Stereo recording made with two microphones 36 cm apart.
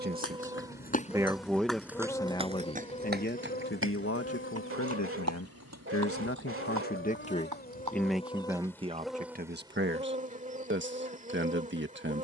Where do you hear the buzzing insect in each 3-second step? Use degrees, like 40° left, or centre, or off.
centre, 30° left, 30° left, 20° right.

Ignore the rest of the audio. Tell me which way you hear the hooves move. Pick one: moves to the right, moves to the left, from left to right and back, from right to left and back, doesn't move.
moves to the right.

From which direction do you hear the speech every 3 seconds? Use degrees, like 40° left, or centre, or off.
centre, 40° left, 10° left, 30° right.